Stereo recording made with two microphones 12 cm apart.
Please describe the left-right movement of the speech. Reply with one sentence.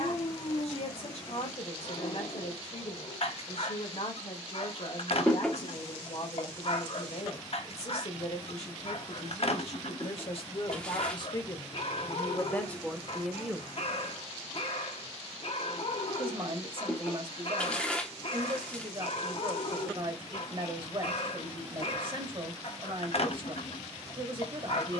You can hear the speech travel towards the right.